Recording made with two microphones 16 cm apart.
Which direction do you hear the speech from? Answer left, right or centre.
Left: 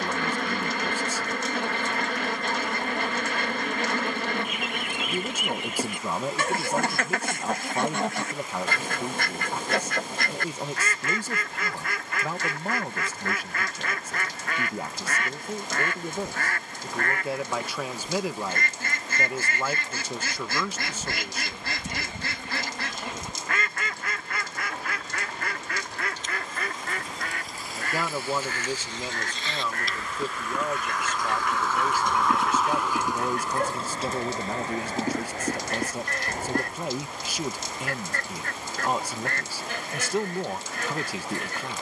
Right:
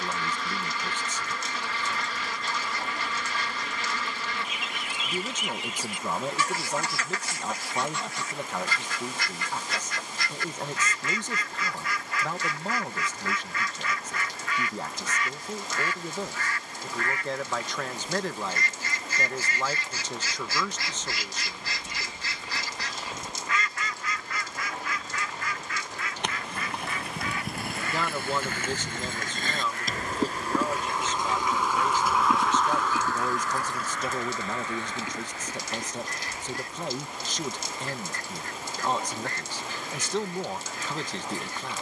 centre.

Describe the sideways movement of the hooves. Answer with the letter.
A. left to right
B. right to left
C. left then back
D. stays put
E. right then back
B.